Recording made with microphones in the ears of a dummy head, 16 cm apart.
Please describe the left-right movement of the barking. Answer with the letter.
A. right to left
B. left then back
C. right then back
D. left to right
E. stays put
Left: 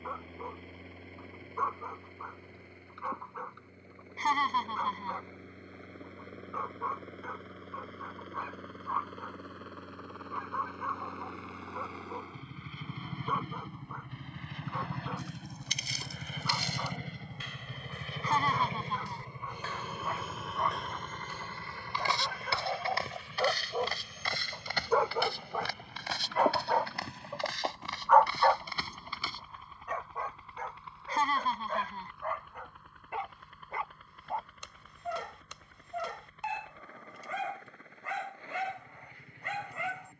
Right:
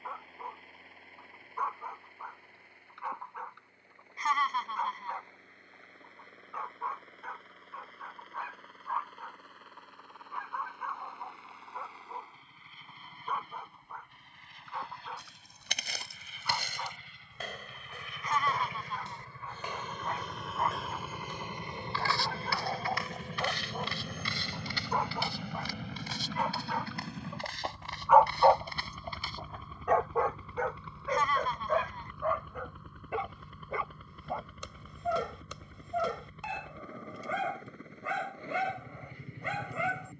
D.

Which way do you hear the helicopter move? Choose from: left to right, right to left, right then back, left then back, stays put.
left to right.